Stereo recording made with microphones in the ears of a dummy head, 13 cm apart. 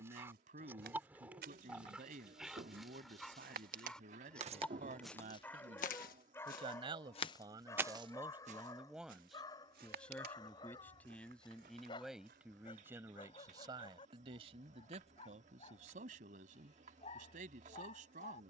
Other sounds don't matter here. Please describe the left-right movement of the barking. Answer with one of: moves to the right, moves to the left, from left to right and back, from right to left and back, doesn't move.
moves to the left.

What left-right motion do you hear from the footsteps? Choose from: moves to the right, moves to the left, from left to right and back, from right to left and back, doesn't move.
from right to left and back.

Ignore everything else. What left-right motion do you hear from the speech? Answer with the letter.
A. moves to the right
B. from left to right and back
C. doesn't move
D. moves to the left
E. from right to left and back
E.